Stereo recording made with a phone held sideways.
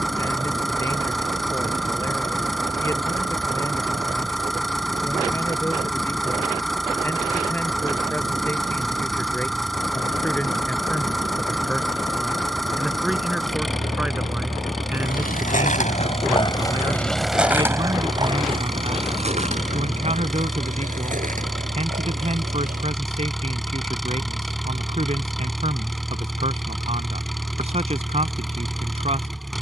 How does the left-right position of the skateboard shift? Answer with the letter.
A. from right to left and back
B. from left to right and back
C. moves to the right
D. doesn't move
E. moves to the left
C.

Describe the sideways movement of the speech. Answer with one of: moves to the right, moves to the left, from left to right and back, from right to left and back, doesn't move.
moves to the right.